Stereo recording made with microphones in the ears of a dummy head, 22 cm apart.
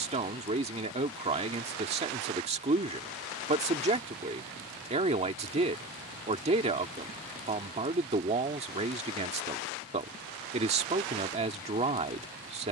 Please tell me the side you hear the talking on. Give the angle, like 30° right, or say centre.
30° right.